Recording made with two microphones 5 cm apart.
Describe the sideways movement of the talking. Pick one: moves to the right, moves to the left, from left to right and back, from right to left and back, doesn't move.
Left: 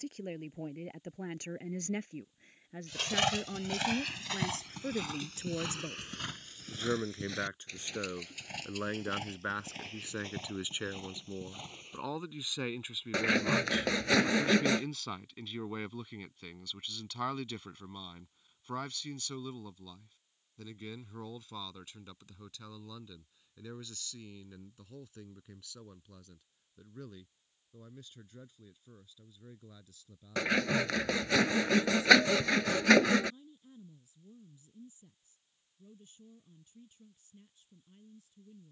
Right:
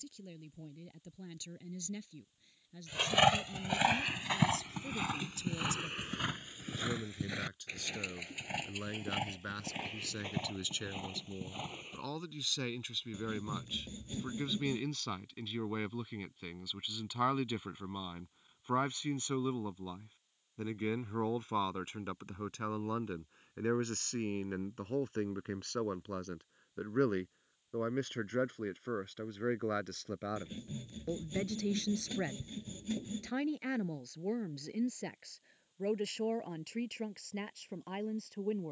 moves to the right.